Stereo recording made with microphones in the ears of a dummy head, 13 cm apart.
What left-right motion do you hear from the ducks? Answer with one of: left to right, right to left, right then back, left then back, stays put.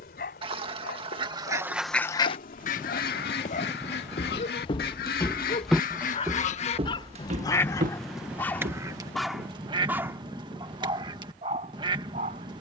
left then back.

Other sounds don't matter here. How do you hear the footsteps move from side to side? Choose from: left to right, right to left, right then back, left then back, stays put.
left to right.